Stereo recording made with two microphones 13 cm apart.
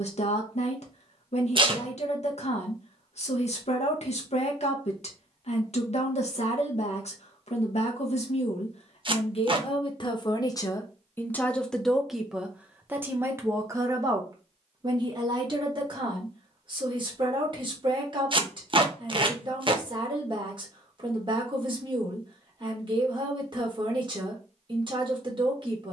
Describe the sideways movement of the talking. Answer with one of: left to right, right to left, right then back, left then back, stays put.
left to right.